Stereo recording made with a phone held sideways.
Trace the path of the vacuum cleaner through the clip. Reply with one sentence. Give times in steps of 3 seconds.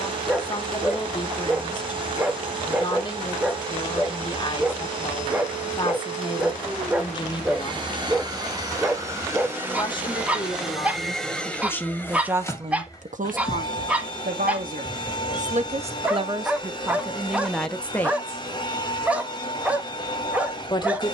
You can hear the vacuum cleaner on the right from 0 s, in the centre from 9 s and on the left from 12 s.